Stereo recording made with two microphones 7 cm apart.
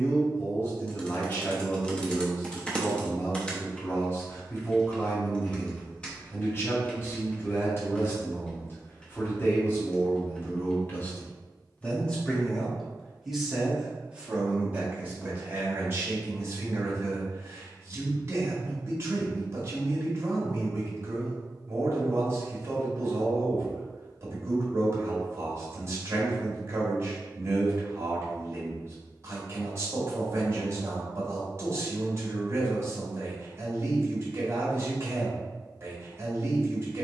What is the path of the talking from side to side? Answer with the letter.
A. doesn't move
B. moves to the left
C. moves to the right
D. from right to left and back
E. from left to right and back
C.